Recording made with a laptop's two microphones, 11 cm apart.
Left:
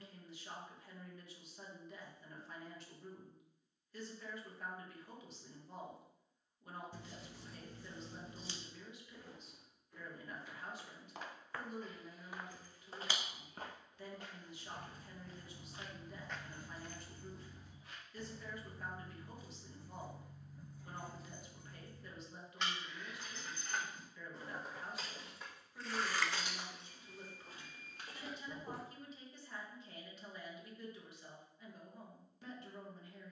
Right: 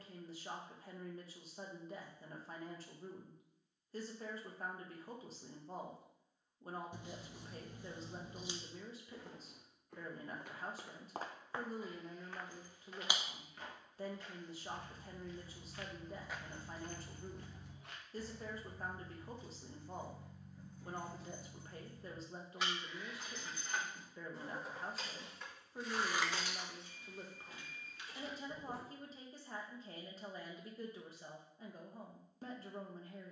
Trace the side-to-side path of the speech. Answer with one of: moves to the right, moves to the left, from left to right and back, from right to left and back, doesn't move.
doesn't move.